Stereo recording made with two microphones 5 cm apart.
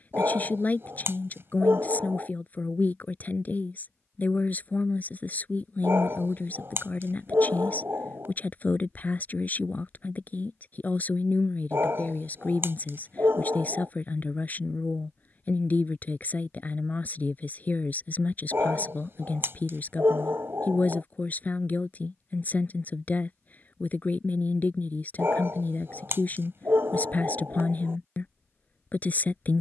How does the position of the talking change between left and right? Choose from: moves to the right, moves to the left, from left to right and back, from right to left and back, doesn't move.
doesn't move.